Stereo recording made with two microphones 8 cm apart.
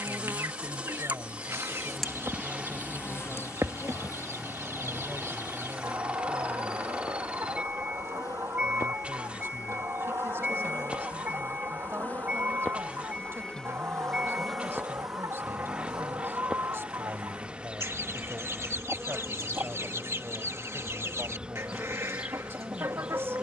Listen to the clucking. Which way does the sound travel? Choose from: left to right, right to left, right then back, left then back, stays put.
stays put.